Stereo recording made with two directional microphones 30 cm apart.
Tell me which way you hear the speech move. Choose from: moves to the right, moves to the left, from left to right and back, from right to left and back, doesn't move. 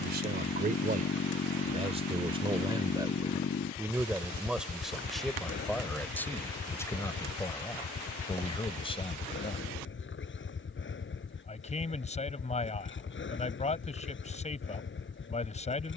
moves to the left.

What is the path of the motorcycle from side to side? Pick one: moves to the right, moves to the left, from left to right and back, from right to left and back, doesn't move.
doesn't move.